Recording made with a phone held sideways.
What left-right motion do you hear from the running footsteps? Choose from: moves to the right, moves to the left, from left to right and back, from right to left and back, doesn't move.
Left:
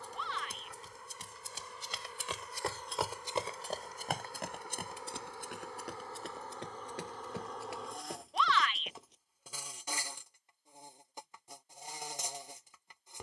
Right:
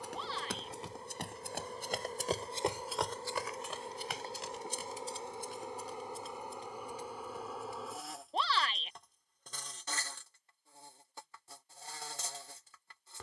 moves to the left.